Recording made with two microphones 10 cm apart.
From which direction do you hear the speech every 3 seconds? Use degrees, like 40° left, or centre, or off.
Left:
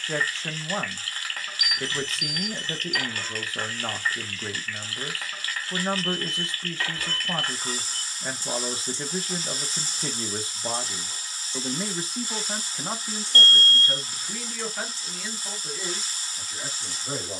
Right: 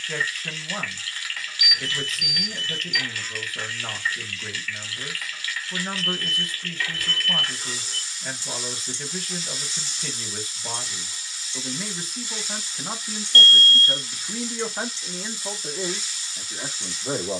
30° left, 30° left, 30° left, 30° left, centre, 40° right.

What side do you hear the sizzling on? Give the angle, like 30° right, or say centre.
40° left.